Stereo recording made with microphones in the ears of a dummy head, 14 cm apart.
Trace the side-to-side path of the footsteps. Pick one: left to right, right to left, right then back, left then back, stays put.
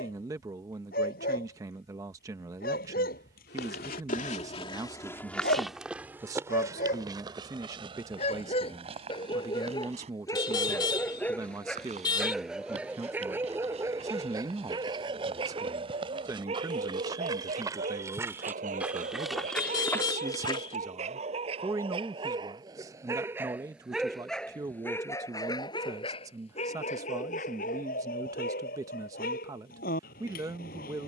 right then back.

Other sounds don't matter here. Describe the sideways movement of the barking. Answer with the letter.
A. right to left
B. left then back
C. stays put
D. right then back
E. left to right
D.